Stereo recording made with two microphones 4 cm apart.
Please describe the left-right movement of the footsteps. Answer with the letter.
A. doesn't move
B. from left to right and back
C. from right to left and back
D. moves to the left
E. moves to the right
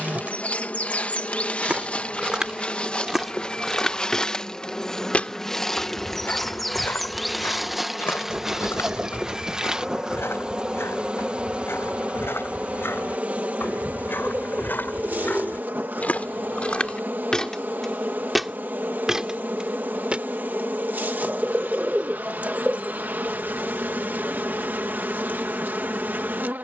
C.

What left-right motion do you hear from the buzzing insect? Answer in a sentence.
In this clip you hear the buzzing insect go from the left side to the right.